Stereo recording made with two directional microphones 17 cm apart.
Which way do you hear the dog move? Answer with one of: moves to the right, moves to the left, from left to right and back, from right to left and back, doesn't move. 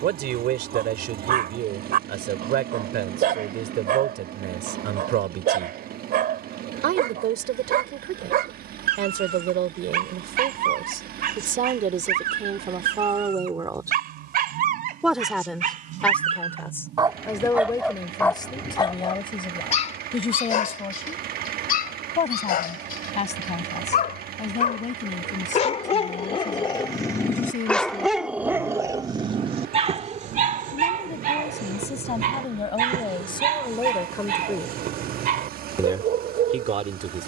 from right to left and back.